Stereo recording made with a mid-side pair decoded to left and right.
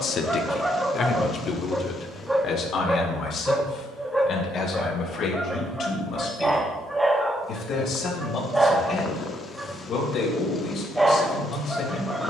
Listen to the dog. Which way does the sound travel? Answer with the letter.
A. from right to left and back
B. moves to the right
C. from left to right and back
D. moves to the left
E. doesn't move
E.